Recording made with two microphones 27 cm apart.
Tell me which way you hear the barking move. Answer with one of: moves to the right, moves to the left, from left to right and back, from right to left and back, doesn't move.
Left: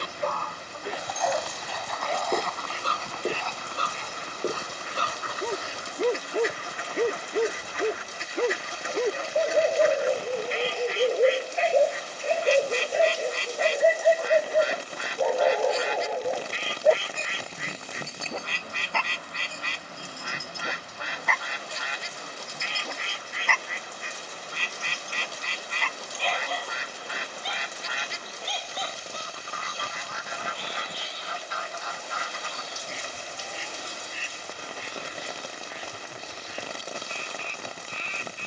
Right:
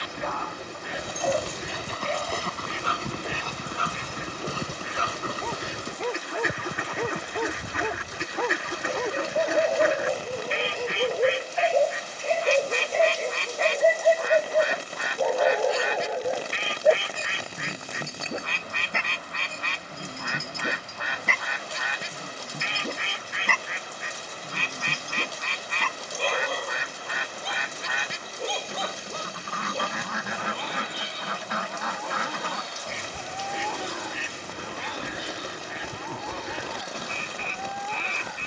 moves to the right.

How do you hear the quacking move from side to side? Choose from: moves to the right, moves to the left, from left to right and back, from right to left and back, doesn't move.
doesn't move.